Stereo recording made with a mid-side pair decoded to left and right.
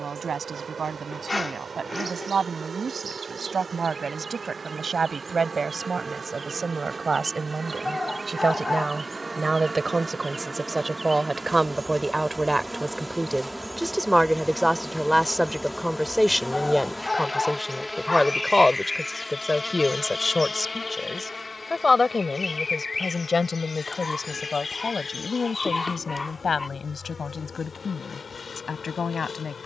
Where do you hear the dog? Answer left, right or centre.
left.